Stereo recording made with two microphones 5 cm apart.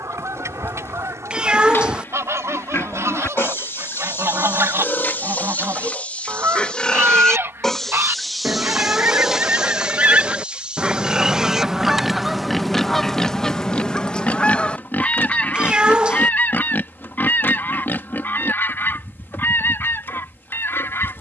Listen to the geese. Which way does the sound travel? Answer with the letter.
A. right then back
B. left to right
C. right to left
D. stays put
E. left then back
C.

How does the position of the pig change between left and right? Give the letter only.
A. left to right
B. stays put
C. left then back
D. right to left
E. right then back
E.